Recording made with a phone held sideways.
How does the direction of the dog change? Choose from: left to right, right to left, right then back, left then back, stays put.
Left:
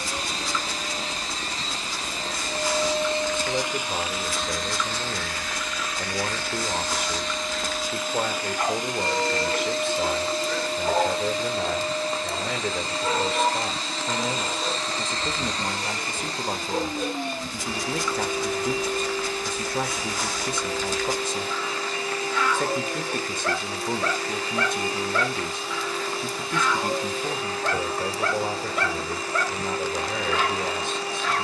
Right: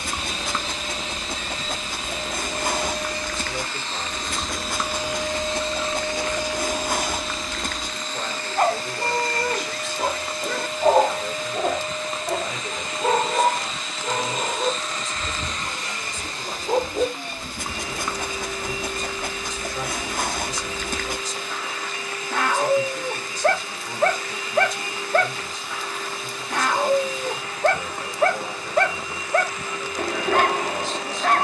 stays put.